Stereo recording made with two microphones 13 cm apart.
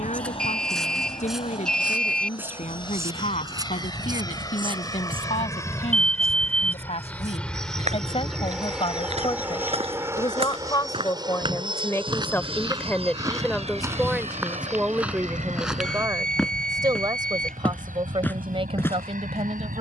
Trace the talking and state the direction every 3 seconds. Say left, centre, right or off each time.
left, left, left, left, centre, right, right.